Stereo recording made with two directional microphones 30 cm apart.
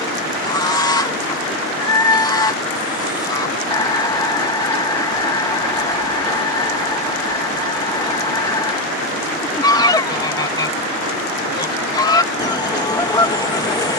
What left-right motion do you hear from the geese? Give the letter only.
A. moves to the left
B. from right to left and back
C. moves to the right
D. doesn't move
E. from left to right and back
D.